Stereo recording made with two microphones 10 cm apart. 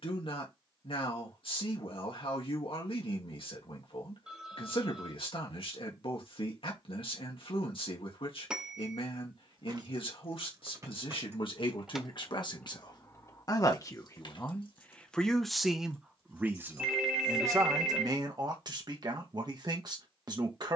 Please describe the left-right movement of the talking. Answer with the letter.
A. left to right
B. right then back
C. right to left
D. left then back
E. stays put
A.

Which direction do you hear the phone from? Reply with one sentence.
You can hear the phone in the centre.